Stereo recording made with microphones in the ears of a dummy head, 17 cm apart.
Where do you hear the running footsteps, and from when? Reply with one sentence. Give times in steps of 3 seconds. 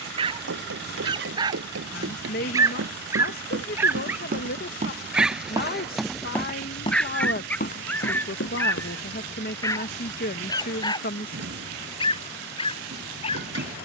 You can hear the running footsteps on the right from 0 s, on the left from 6 s and not at all from 9 s.